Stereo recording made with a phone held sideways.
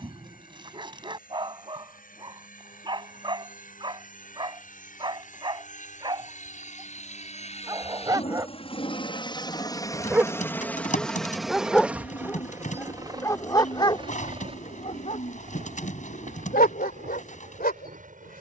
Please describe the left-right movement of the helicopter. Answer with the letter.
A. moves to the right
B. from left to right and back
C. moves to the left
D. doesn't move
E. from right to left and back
A.